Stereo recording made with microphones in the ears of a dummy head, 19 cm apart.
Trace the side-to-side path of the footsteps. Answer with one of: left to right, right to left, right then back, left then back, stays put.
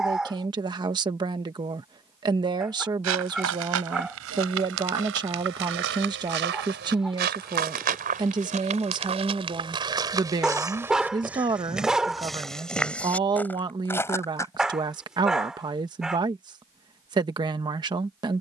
right to left.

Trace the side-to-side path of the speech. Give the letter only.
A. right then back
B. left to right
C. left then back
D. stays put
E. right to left
D.